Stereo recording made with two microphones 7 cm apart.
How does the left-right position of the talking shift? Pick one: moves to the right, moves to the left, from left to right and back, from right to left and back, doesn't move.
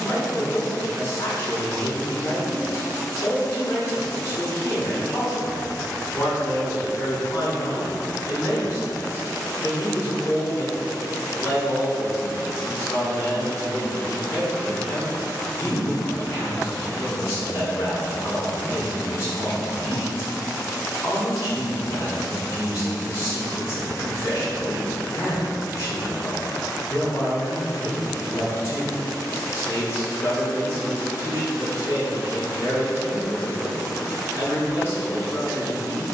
doesn't move.